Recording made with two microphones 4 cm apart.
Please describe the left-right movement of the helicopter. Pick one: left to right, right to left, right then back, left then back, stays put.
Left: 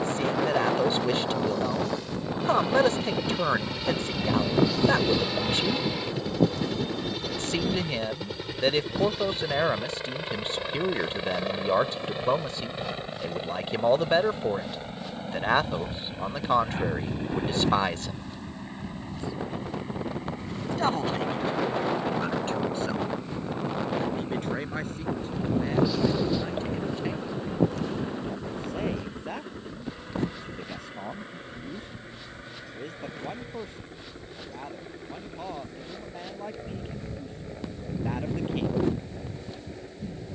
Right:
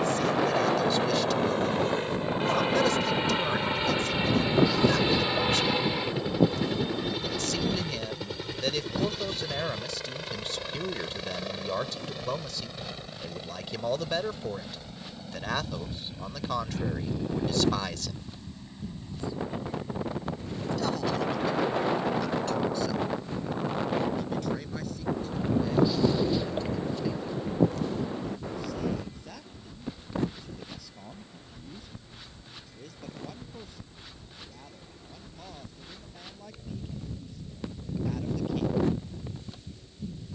right to left.